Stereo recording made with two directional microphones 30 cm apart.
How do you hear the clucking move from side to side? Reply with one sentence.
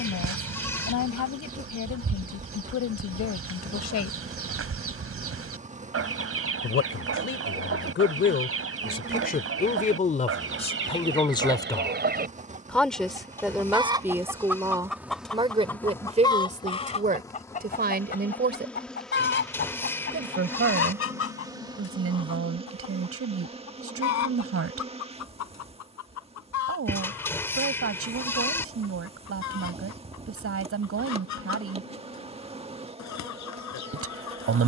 In this clip you hear the clucking move to the left.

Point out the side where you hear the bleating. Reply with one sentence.
In this clip you hear the bleating in the centre.